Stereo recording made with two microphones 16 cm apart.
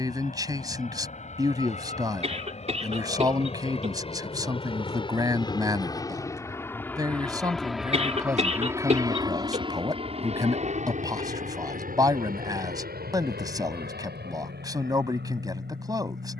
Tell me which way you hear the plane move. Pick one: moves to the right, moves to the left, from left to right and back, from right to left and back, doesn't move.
moves to the right.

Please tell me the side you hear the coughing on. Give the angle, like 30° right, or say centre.
40° right.